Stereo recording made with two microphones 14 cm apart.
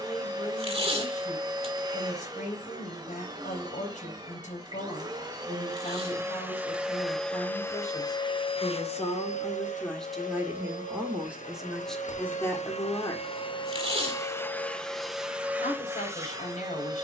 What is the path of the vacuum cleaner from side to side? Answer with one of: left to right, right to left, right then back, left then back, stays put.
left then back.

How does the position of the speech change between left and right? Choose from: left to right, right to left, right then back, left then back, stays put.
right then back.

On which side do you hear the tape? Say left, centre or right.
right.